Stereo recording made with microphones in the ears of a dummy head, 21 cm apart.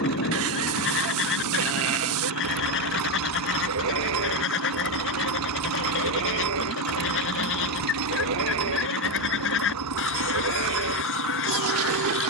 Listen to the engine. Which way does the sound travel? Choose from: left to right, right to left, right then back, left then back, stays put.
stays put.